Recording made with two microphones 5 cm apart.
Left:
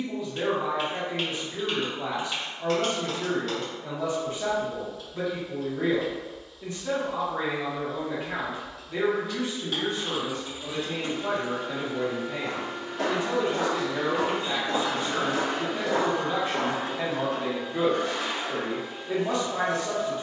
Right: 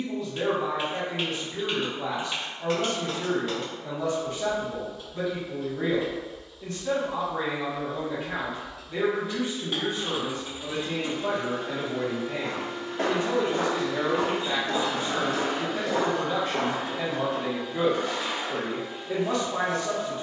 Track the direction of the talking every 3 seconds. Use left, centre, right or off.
centre, centre, centre, right, right, centre, centre.